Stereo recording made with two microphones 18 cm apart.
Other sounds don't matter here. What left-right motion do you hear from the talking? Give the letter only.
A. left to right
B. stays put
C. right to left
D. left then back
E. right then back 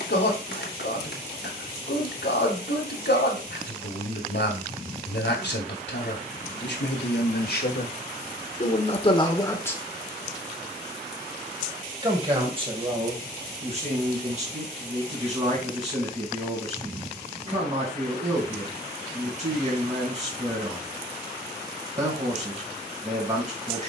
A.